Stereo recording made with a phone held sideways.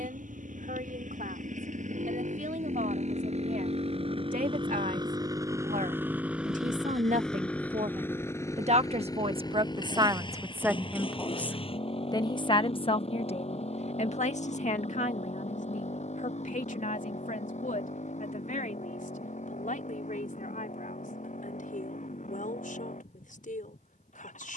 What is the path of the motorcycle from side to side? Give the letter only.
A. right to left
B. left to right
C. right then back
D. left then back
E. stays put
A.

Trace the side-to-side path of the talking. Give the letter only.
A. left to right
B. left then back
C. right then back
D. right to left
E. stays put
D.